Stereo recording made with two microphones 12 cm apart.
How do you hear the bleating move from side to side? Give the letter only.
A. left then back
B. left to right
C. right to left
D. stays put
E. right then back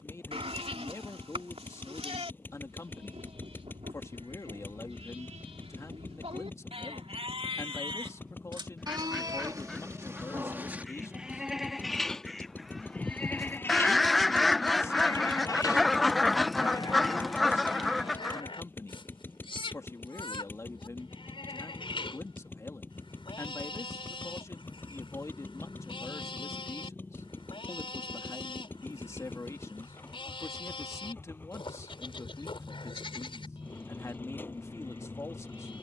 C.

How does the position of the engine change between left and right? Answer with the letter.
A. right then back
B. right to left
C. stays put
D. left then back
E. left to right
C.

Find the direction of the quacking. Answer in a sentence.
In this clip you hear the quacking in the centre.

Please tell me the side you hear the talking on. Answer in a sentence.
In this clip you hear the talking on the left.